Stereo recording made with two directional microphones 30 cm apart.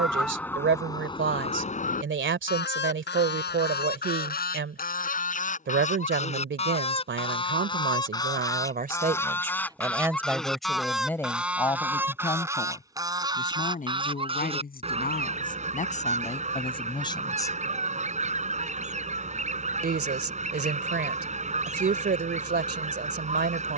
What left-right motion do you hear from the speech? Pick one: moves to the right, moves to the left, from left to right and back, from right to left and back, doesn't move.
from right to left and back.